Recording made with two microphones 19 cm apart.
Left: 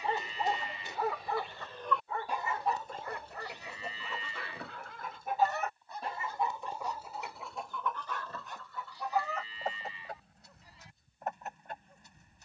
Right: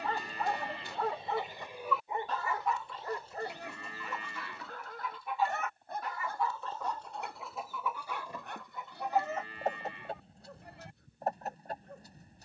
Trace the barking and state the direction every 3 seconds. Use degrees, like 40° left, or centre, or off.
centre, 40° right, 60° right, 60° right.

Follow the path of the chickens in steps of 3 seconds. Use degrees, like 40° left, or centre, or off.
10° right, 50° left, centre, 30° right.